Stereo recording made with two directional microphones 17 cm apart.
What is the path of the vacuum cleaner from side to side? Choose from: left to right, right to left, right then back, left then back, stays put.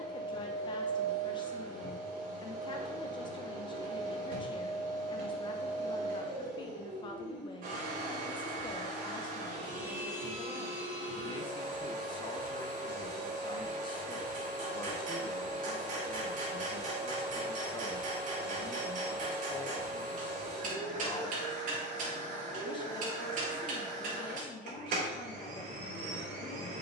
stays put.